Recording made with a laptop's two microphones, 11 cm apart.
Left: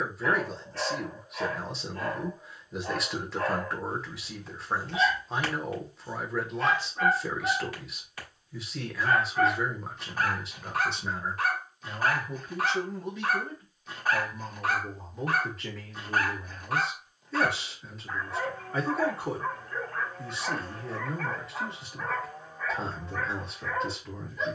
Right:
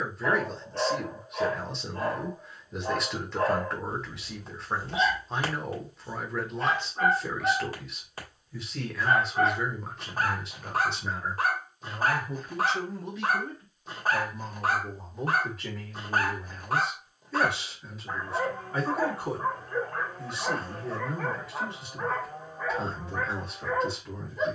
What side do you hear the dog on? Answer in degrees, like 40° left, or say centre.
40° right.